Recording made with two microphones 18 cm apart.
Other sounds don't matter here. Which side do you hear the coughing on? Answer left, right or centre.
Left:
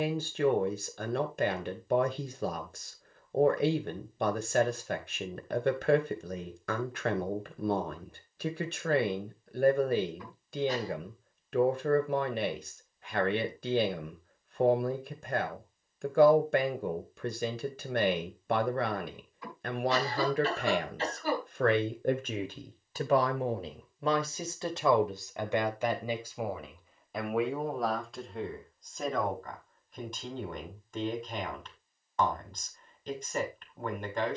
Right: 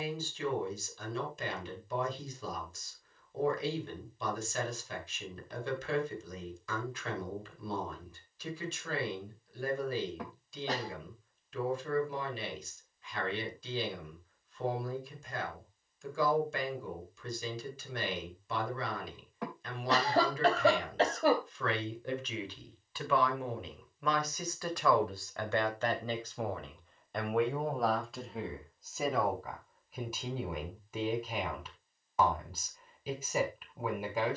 right.